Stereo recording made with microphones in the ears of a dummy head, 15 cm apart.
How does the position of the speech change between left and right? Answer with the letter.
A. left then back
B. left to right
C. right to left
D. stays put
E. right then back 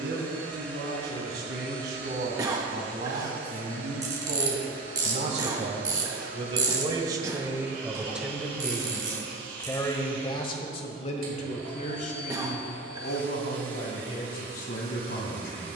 C.